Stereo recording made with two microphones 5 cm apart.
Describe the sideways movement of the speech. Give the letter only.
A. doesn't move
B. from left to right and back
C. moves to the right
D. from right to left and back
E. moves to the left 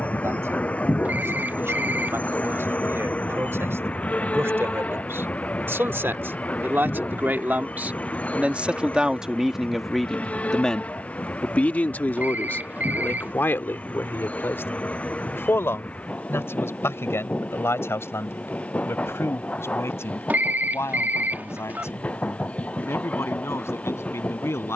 E.